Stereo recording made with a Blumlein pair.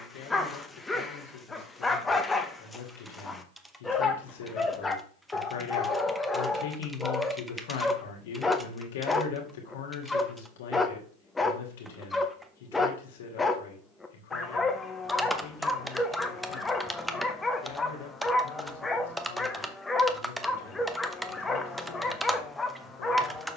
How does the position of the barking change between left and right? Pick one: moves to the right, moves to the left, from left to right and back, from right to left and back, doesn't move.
doesn't move.